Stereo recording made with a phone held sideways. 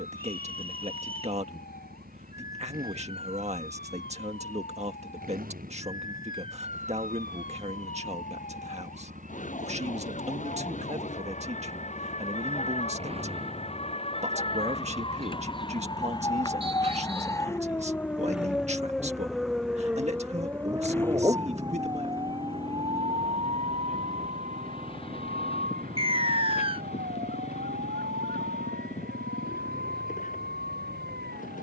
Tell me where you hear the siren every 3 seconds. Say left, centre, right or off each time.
left, left, left, left, left, left, centre, right, right, right, right.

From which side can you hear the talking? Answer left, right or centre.
right.